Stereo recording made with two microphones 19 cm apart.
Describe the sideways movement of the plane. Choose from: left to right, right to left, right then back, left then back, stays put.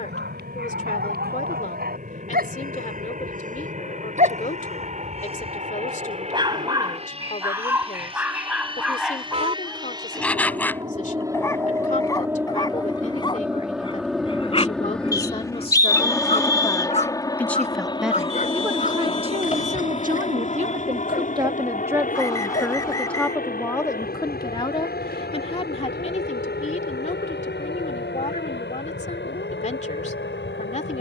right to left.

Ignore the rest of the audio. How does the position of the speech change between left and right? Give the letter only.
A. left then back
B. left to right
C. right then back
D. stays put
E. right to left
C.